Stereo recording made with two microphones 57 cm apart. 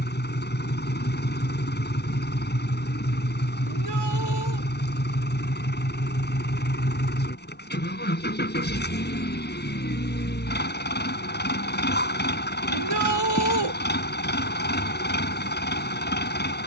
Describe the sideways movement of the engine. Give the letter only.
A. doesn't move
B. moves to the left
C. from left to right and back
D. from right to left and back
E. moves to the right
A.